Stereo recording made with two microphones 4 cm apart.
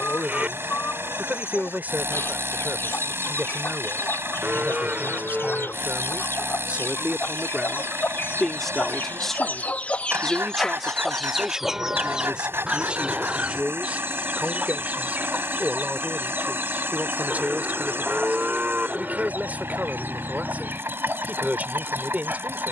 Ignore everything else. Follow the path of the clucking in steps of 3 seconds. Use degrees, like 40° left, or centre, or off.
80° left, 80° left, 70° left, 20° left, 30° right, 50° right, 60° right, 60° right.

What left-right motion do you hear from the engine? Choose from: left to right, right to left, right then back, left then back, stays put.
stays put.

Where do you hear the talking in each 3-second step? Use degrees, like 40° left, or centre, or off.
50° right, 50° right, 20° right, 10° right, 30° right, 40° right, 40° right, 40° right.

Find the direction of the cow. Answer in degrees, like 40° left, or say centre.
40° right.